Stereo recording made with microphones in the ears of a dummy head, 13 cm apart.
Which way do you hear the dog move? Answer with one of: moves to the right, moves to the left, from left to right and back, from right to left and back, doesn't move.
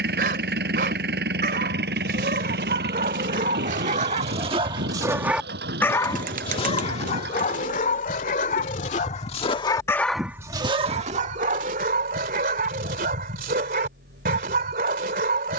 from right to left and back.